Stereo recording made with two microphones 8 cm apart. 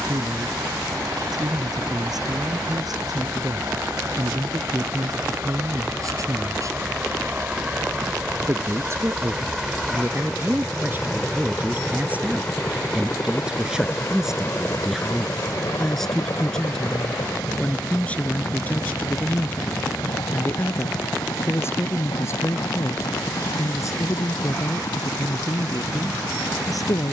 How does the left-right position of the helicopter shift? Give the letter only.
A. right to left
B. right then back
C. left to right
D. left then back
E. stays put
A.